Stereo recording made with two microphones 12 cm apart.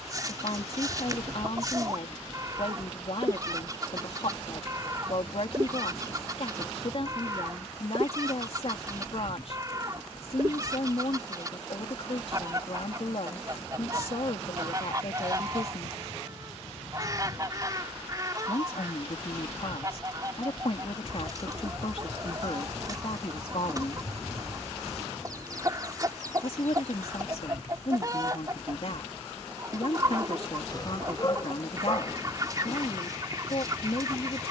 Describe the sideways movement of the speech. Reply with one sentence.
You can hear the speech stay put.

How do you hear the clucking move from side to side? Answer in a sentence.
You can hear the clucking stay put.